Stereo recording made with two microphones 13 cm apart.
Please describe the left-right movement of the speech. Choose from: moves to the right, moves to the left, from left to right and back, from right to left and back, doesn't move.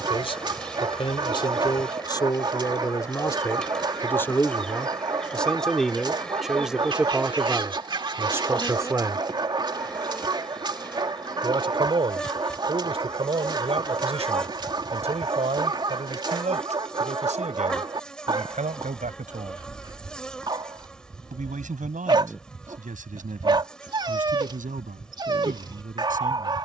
moves to the right.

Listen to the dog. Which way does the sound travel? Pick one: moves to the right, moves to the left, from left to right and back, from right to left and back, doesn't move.
doesn't move.